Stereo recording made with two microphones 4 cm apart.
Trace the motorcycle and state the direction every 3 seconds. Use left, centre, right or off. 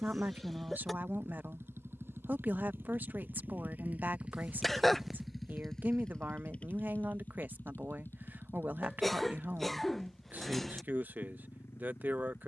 right, right, left, left.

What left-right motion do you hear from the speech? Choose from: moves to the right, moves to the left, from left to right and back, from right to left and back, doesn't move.
doesn't move.